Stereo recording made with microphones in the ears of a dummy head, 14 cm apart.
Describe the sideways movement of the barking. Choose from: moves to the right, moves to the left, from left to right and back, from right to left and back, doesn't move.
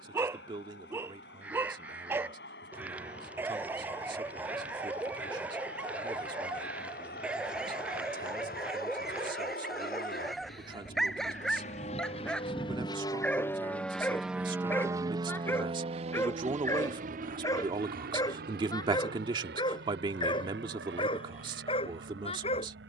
moves to the left.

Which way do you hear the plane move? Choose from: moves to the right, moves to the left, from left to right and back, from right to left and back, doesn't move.
moves to the right.